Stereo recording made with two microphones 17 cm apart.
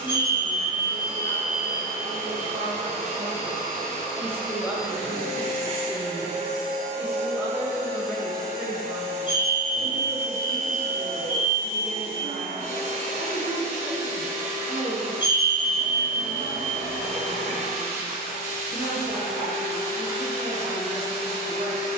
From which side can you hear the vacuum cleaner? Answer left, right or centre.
right.